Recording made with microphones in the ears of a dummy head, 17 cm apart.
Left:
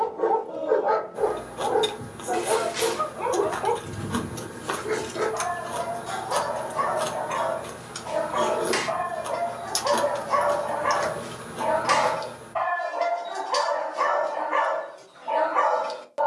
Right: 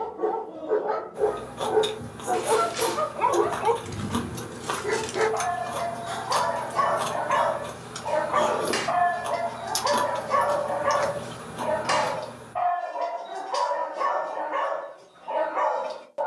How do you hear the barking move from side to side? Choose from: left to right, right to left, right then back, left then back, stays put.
right then back.